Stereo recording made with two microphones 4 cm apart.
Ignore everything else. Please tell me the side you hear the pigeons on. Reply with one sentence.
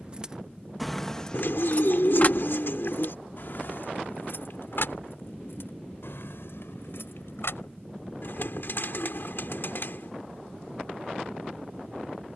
In this clip you hear the pigeons on the left.